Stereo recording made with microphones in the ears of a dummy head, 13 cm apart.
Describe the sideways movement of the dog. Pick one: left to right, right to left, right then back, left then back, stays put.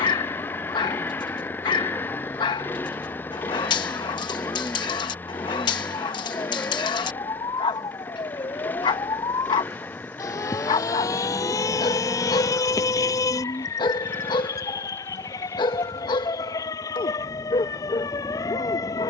stays put.